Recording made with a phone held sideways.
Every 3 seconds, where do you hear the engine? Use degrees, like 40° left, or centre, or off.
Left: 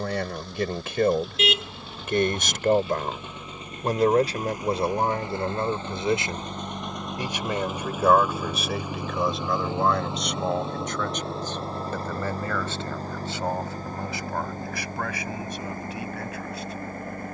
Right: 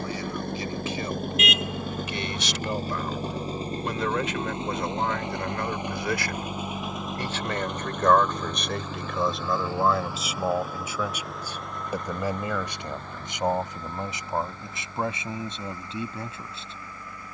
50° right, 30° right, centre, 20° left, 40° left, 50° left.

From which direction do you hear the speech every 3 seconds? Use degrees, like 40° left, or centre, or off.
60° left, 30° left, 10° left, centre, 20° right, 20° right.